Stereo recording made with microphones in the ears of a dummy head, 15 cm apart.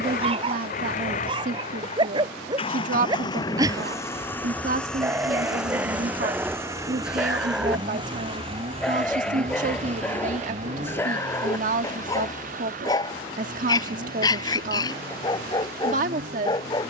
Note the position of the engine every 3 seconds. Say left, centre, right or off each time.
left, centre, right, right, right, right.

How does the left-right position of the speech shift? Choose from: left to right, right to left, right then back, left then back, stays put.
stays put.